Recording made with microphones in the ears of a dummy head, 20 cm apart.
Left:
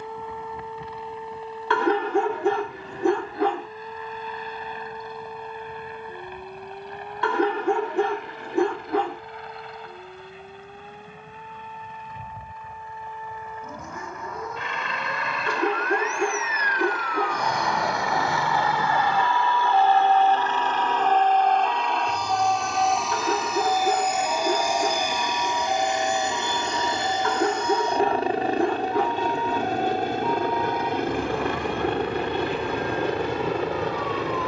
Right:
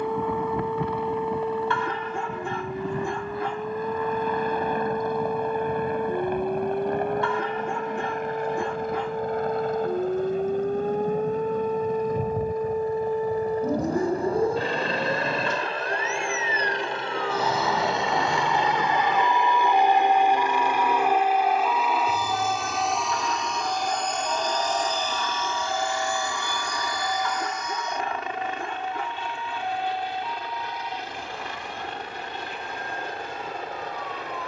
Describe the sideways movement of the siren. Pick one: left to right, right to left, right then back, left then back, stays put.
right to left.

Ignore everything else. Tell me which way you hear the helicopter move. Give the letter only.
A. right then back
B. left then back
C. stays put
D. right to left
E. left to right
D.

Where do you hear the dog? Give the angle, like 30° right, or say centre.
60° left.